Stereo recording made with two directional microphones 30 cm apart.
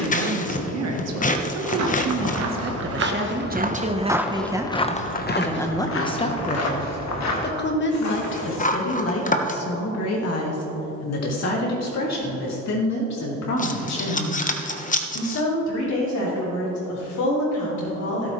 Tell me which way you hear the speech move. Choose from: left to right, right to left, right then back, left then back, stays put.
right to left.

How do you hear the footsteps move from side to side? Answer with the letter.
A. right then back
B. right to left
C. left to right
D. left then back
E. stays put
B.